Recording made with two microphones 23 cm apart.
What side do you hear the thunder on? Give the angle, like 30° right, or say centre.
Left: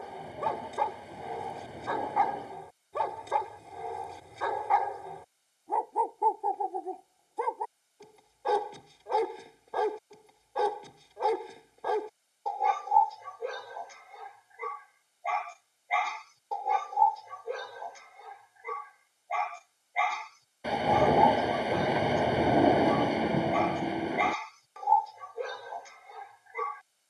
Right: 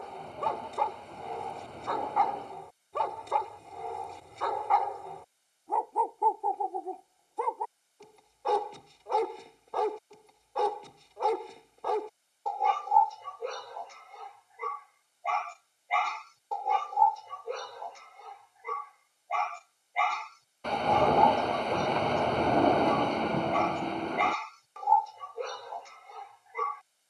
10° left.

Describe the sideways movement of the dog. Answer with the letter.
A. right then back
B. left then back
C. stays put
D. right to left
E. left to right
C.